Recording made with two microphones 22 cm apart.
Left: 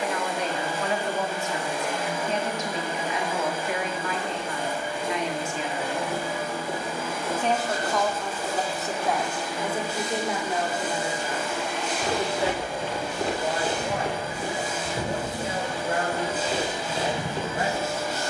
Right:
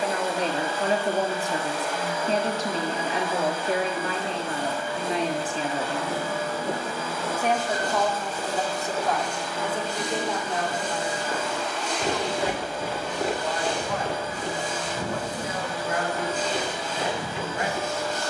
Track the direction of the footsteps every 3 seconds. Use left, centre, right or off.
off, right, right, right, centre, left.